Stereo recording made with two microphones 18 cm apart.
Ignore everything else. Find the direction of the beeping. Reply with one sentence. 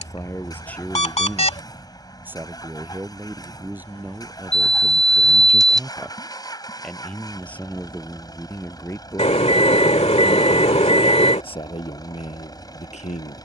You can hear the beeping on the left.